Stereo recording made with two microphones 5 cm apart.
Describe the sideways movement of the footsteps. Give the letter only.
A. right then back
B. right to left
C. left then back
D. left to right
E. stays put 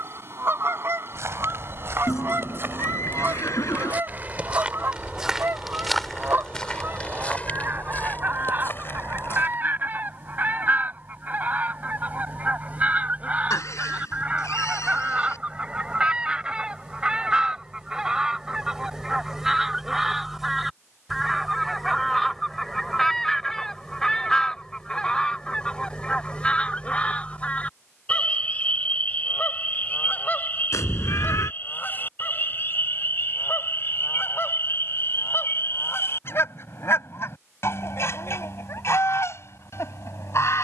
B.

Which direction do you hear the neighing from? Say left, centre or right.
left.